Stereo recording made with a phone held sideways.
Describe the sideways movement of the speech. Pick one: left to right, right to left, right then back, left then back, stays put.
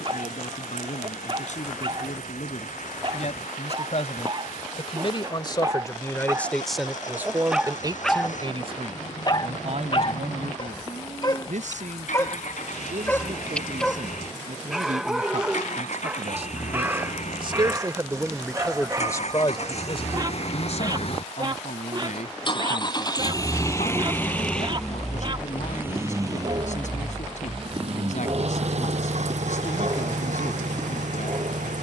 right then back.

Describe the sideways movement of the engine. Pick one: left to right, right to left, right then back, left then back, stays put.
left to right.